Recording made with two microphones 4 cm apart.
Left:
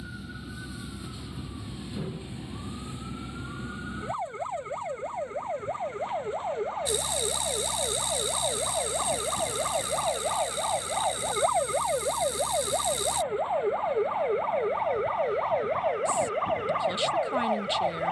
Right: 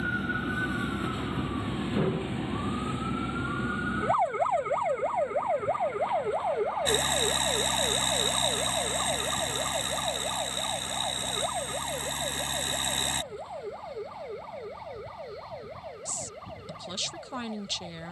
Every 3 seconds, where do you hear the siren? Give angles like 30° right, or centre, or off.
40° right, 20° right, centre, 20° left, 40° left, 50° left.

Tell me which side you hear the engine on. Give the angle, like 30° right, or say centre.
50° right.